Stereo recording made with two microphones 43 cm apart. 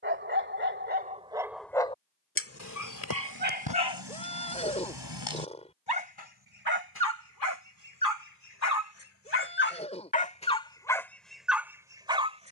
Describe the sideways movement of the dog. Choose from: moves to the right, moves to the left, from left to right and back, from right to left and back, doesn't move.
from right to left and back.